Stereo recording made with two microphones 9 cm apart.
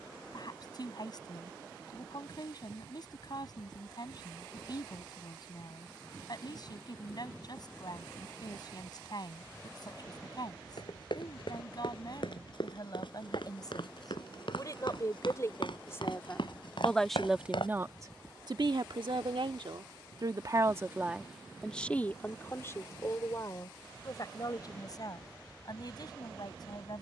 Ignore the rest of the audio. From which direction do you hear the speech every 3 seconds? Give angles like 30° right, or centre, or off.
50° left, 50° left, 50° left, 50° left, 50° left, 20° left, 60° right, 20° left, 50° left.